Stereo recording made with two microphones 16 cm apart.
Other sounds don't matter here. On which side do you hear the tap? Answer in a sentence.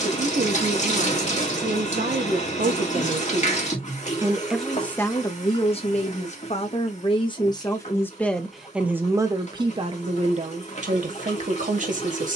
You can hear the tap on the left.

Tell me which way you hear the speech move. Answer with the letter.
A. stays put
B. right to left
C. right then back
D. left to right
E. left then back
E.